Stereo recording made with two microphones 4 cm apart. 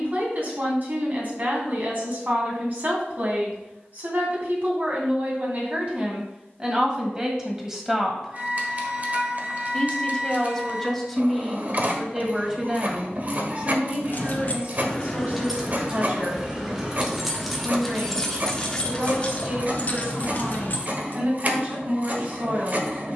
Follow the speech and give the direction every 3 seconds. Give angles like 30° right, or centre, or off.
50° right, 40° right, 20° right, 10° left, 30° right, 40° right, 40° right, 40° right.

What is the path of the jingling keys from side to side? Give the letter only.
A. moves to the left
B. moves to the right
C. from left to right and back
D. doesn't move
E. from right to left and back
C.